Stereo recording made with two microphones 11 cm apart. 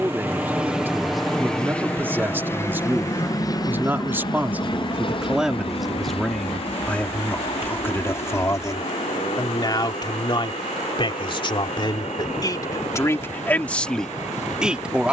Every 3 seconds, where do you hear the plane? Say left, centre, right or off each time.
centre, left, left, left, left.